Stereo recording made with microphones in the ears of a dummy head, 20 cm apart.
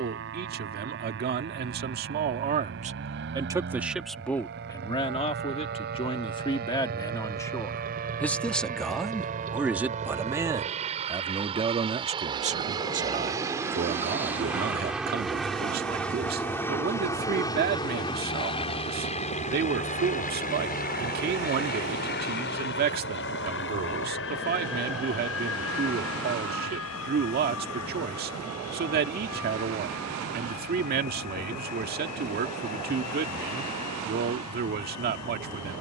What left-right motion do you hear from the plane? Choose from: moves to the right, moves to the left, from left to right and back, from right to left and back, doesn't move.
moves to the left.